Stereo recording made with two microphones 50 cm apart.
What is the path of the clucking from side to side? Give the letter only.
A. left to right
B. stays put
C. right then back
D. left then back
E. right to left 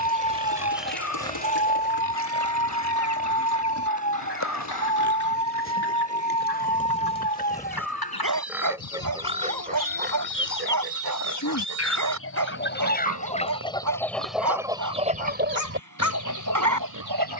A.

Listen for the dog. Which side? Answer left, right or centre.
right.